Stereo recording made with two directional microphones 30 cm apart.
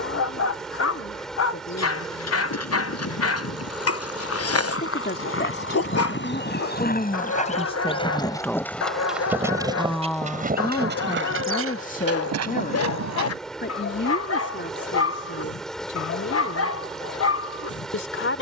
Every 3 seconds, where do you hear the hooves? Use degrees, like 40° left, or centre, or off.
50° left, 50° left, 20° left, 30° right, 60° right, off.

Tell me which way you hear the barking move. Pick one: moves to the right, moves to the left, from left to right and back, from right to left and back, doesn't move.
doesn't move.